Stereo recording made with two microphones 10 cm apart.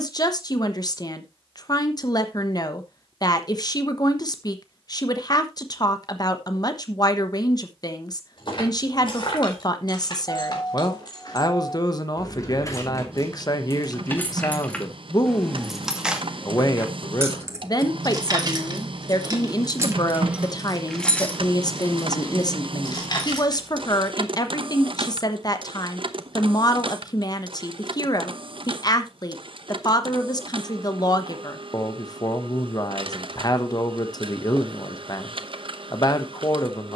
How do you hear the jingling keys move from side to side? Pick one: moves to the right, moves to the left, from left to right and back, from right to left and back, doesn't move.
from left to right and back.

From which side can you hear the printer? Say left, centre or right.
right.